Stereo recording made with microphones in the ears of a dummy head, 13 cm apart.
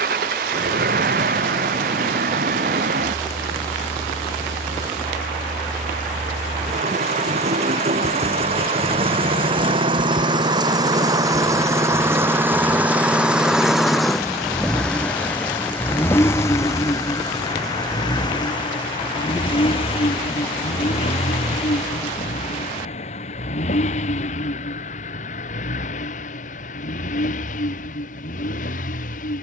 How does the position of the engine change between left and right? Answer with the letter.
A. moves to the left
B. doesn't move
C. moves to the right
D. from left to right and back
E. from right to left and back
A.